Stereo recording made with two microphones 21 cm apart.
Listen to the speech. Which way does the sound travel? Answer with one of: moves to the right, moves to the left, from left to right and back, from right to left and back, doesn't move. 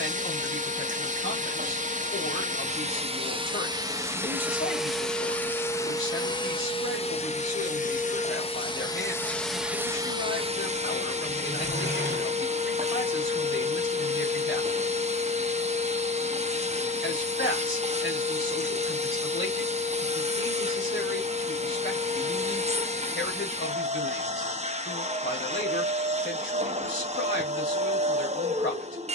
doesn't move.